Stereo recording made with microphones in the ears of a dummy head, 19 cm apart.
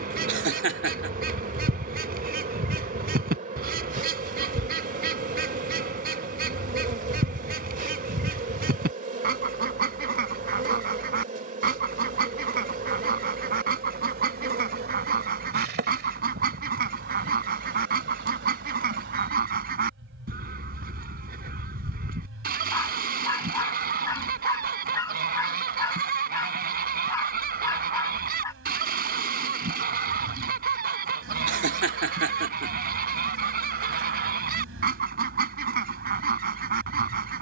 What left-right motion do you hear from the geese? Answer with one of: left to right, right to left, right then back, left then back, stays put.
stays put.